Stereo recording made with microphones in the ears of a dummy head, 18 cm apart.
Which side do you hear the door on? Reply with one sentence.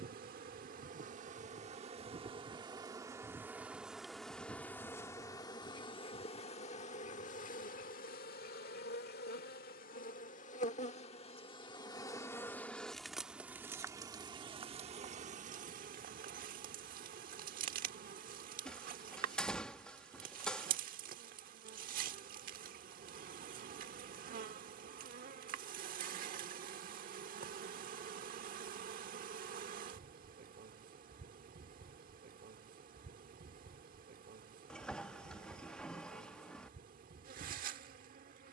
You can hear the door in the centre.